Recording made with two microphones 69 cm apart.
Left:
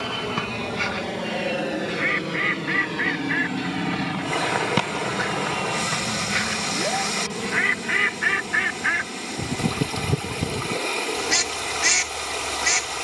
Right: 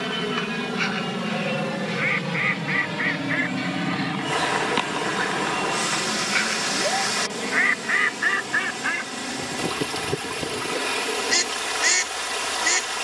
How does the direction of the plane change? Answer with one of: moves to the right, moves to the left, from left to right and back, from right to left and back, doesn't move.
moves to the left.